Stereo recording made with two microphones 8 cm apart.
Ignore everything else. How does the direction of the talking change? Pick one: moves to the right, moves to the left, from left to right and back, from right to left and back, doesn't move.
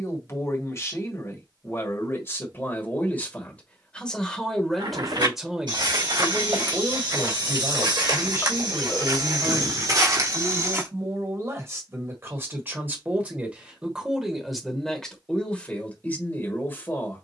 from left to right and back.